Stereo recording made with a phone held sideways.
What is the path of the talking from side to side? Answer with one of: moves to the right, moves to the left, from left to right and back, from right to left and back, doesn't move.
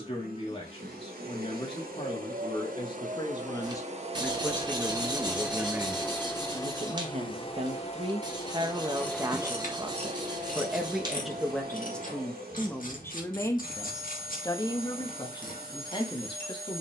from left to right and back.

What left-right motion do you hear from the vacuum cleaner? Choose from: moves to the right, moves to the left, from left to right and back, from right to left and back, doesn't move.
from right to left and back.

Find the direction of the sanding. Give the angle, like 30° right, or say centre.
30° right.